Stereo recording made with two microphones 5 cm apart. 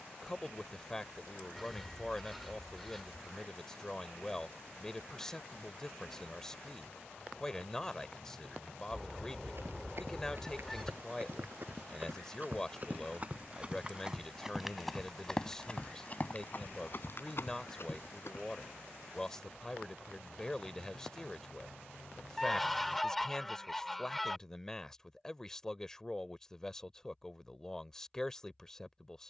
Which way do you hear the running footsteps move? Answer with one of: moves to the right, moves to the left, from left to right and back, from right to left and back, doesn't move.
moves to the left.